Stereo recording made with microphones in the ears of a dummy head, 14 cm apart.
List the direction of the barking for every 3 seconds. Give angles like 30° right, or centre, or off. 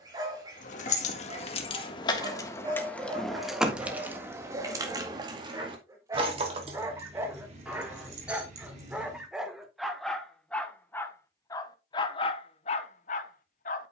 30° right, 30° right, 20° right, 10° left, 40° left.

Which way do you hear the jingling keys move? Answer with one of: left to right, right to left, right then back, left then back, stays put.
left to right.